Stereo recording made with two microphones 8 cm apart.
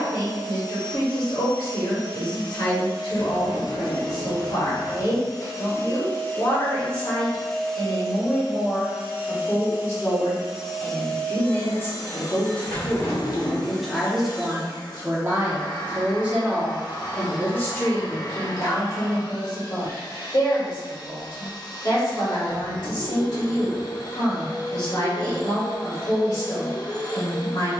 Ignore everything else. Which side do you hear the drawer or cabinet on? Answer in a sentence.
In this clip you hear the drawer or cabinet on the left.